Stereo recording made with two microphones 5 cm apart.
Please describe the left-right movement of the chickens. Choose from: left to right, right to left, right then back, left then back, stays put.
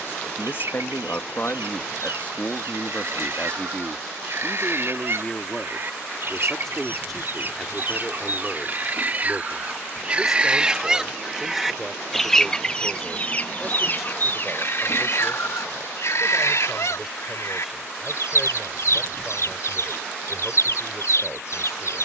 right to left.